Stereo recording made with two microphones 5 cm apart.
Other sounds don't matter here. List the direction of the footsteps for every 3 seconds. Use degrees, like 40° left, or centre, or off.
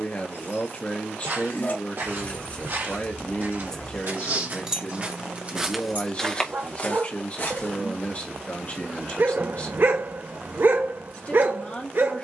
70° right, 40° right, 40° left, off.